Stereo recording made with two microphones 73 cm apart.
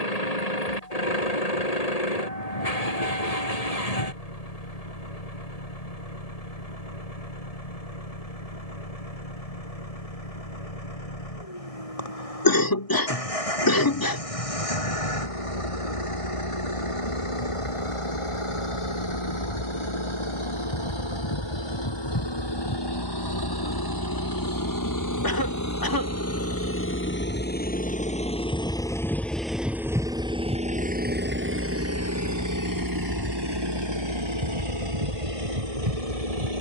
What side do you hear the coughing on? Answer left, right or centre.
left.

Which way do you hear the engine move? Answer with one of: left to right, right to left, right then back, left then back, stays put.
left to right.